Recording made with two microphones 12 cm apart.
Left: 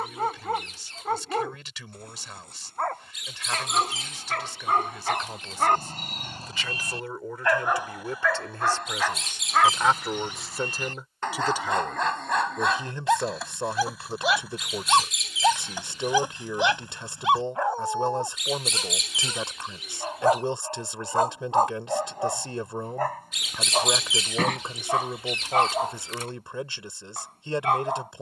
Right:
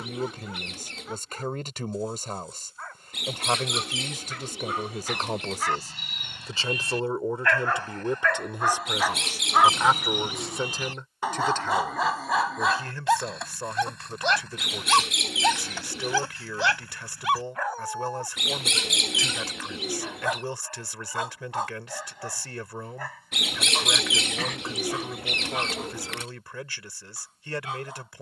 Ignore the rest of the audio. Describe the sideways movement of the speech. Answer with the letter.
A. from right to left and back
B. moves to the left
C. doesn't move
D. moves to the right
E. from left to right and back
B.